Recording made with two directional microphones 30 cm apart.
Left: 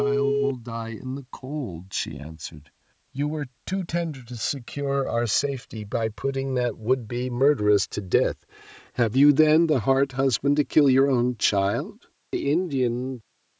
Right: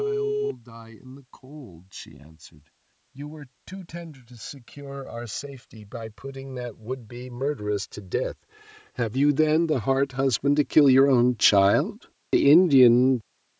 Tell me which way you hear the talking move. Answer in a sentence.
You can hear the talking move to the right.